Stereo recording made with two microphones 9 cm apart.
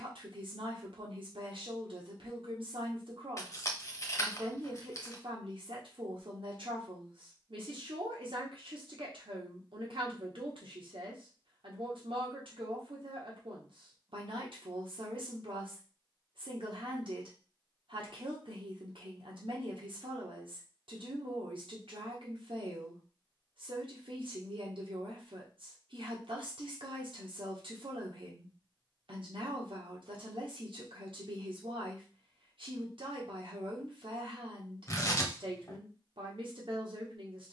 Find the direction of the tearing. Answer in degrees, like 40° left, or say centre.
30° left.